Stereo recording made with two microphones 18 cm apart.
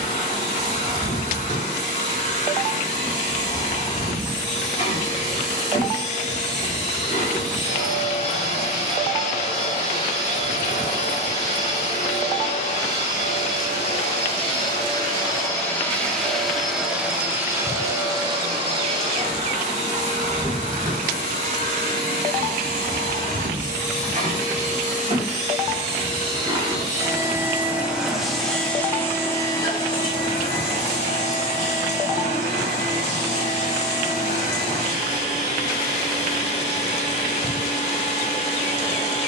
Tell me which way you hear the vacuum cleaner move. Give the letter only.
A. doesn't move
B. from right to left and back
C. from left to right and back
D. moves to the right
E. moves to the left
C.